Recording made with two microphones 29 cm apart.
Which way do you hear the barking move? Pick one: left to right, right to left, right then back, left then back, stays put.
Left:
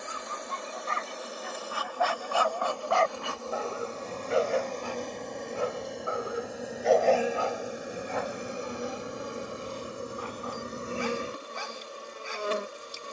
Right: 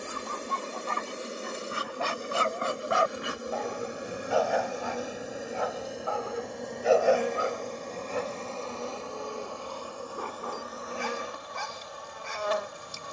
left then back.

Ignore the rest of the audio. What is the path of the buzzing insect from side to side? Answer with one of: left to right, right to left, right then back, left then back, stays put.
right to left.